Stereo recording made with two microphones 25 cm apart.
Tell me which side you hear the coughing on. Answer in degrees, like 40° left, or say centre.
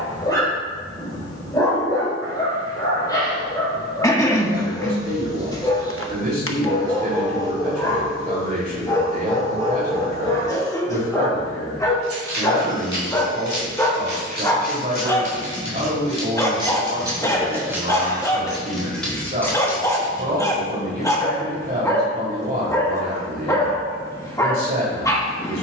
10° left.